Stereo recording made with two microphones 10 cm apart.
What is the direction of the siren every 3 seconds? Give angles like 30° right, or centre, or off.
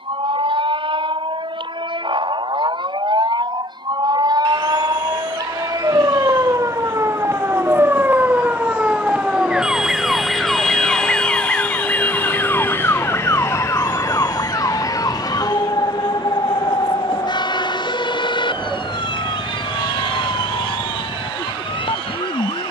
60° right, 50° right, 30° right, centre, 30° left, 50° left, 60° left, 60° left.